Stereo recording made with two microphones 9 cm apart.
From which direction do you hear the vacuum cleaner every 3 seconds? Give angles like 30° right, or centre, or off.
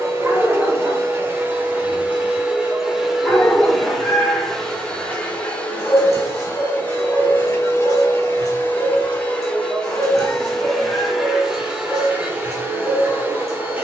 20° right, centre, 20° left, centre, 20° right.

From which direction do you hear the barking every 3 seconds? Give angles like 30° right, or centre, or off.
10° right, 20° left, 40° left, 40° left, 40° left.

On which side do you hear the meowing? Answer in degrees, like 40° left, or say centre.
20° left.